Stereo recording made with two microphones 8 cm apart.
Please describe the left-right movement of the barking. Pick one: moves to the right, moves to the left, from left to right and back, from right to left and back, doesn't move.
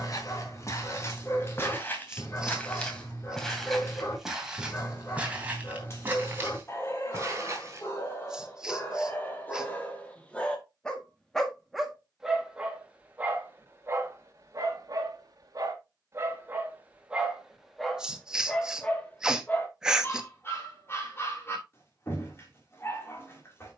from left to right and back.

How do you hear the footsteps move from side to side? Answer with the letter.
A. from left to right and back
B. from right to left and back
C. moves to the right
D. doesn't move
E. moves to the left
C.